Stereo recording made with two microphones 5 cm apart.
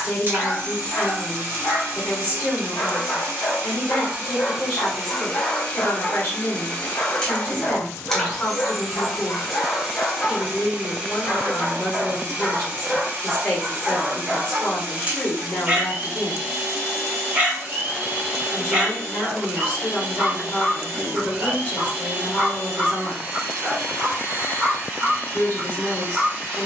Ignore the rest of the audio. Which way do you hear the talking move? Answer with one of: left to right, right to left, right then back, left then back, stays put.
stays put.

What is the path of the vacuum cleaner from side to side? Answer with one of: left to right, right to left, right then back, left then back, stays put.
left then back.